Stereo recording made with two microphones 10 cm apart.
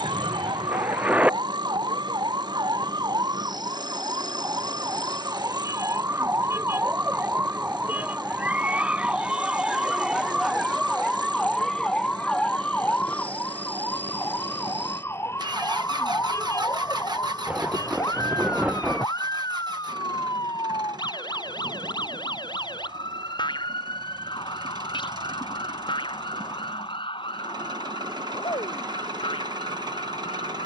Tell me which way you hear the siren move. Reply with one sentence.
You can hear the siren travel towards the left.